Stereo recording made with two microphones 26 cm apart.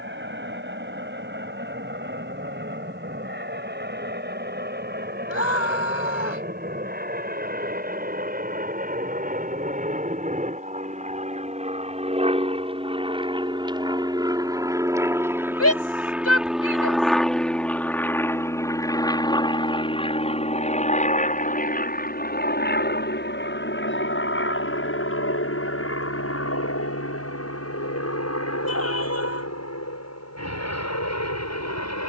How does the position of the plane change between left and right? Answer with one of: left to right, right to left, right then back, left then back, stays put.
right to left.